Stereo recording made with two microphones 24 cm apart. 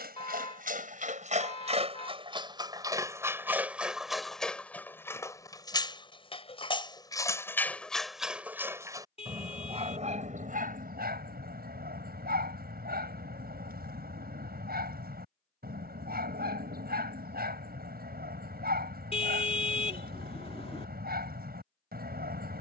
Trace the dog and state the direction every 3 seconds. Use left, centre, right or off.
right, centre, centre, right, right, right, right, right.